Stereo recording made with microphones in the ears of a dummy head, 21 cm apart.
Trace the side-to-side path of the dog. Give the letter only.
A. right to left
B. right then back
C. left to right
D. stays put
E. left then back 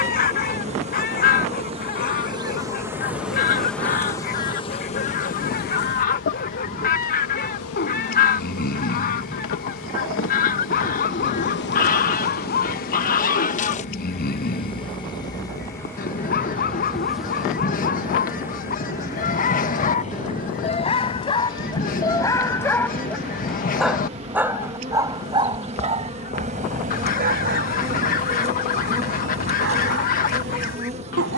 C.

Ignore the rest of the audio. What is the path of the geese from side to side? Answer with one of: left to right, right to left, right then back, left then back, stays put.
stays put.